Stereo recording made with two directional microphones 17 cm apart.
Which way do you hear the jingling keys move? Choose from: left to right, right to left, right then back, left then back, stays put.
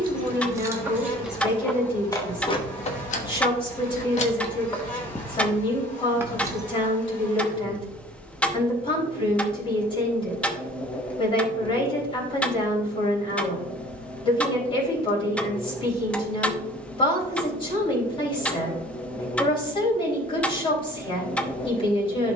left then back.